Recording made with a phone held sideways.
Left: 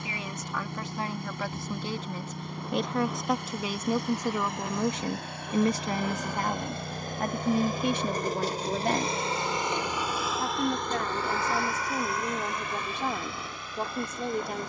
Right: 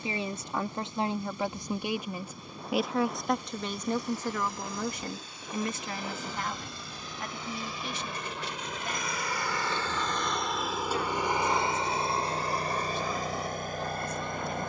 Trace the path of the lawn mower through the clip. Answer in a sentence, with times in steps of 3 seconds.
You can hear the lawn mower on the left from 0 s, in the centre from 9 s and on the right from 12 s.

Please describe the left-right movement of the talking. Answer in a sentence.
You can hear the talking move to the left.